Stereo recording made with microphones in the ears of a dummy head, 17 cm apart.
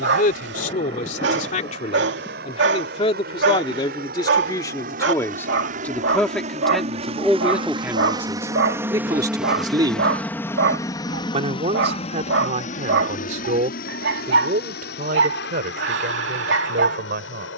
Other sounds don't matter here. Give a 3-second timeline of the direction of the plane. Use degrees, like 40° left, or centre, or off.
70° right, 50° right, 30° right, 10° left, 50° left, 60° left.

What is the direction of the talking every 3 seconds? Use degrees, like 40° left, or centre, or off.
40° left, 20° left, centre, 30° right, 40° right, 50° right.